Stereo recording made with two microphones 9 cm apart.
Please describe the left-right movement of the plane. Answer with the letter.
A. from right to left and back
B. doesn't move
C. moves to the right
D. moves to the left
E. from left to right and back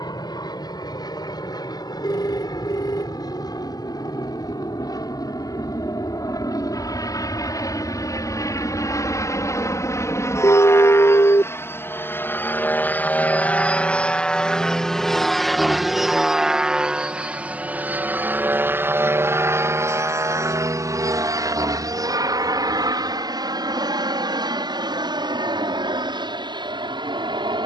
C.